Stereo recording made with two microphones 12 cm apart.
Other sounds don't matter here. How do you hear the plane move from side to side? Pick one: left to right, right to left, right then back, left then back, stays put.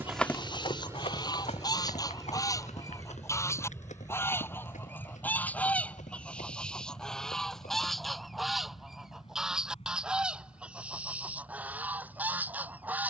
right to left.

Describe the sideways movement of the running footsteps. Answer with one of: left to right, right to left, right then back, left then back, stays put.
right to left.